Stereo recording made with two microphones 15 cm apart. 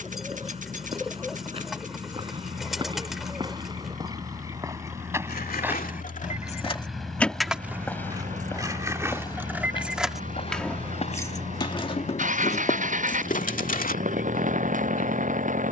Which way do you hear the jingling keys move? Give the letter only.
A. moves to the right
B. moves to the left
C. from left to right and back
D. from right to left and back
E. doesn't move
C.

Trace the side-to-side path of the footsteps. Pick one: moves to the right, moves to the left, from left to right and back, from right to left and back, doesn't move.
moves to the left.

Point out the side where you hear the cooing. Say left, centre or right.
centre.